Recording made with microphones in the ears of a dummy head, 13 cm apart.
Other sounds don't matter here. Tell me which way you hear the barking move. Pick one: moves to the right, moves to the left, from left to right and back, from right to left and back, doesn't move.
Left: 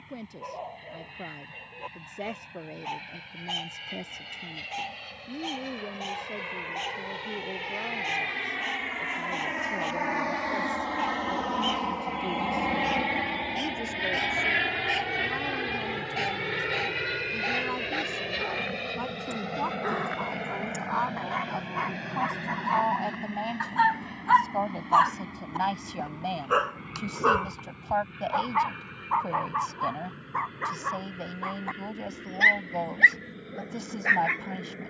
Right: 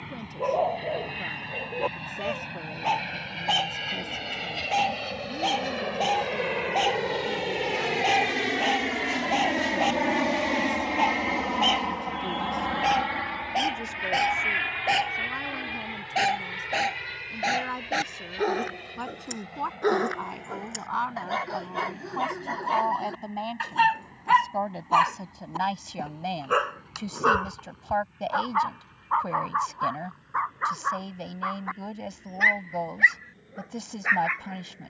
moves to the left.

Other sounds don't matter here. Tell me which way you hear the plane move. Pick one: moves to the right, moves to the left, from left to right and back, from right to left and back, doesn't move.
moves to the left.